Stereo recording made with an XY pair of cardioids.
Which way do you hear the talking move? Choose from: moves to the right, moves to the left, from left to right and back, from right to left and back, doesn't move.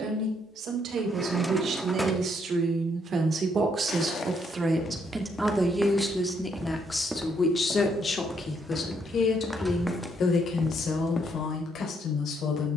moves to the left.